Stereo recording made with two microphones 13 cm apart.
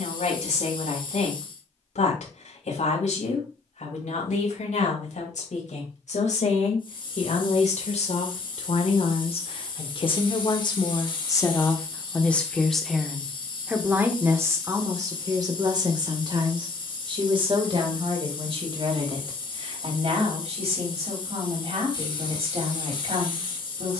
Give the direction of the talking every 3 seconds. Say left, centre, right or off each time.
left, left, left, left, centre, right, right, right.